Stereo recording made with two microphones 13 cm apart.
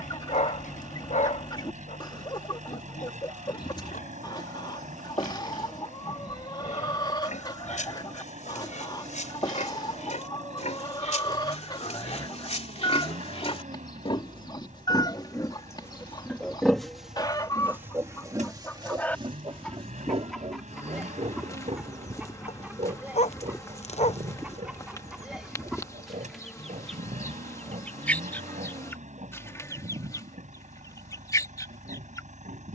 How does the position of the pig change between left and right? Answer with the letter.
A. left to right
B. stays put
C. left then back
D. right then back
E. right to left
A.